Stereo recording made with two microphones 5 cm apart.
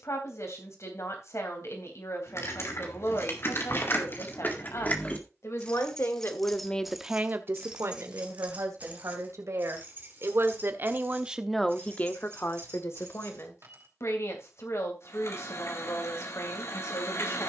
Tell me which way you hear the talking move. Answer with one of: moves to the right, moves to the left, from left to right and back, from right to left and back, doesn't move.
from left to right and back.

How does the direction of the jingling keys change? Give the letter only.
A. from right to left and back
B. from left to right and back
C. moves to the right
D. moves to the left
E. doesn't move
C.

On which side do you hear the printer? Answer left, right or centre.
left.